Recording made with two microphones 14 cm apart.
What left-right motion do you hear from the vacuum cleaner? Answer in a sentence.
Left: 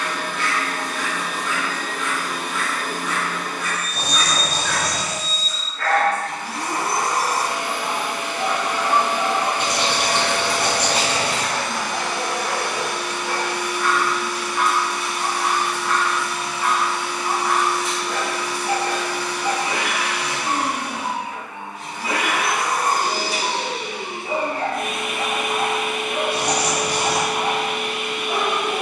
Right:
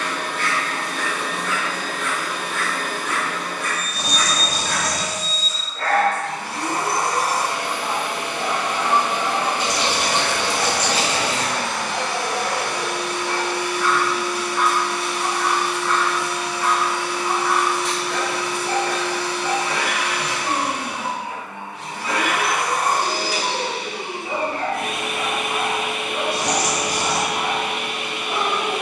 In this clip you hear the vacuum cleaner stay in one place.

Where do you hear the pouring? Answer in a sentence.
In this clip you hear the pouring on the left.